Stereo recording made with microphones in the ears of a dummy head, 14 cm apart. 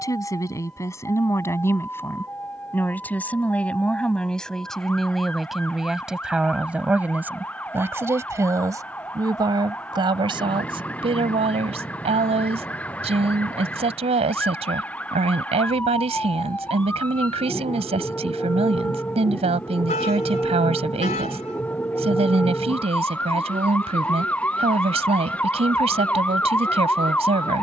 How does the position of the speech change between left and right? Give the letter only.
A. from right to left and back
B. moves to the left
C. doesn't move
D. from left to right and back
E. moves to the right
E.